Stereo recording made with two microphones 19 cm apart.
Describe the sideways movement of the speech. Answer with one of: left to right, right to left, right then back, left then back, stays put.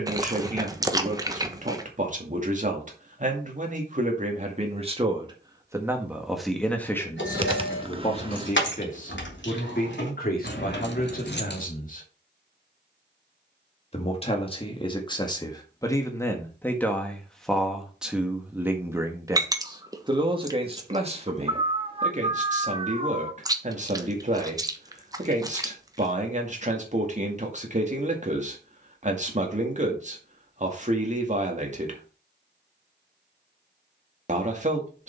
left then back.